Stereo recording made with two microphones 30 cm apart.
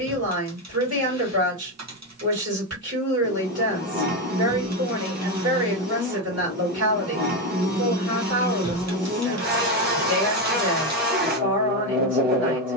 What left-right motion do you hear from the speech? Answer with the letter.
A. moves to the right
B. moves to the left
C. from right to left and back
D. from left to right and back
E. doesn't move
E.